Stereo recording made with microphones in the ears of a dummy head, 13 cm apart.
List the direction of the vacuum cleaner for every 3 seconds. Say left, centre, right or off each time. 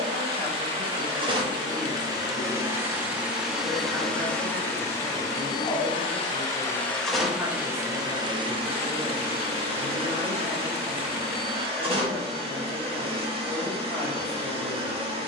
right, centre, centre, right, right.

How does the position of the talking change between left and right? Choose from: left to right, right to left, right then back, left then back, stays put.
right then back.